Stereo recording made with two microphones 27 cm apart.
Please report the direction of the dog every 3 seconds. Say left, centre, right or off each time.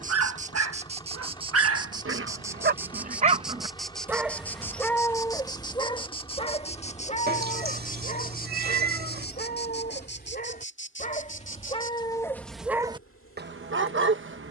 right, centre, left, left, right.